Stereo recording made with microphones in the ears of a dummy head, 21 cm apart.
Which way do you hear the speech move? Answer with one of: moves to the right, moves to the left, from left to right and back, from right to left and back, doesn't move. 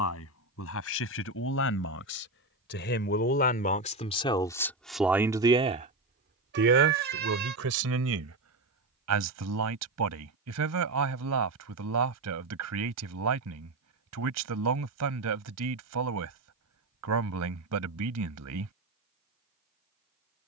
moves to the right.